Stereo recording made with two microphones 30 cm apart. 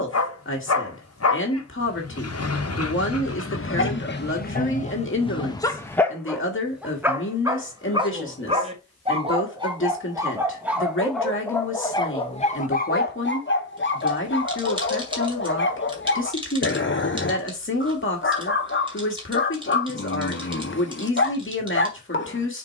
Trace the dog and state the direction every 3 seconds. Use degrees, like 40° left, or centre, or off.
50° left, 30° left, 10° right, 10° right, 30° left, 40° left, 40° left, 40° left.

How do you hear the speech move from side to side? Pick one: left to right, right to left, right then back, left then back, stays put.
stays put.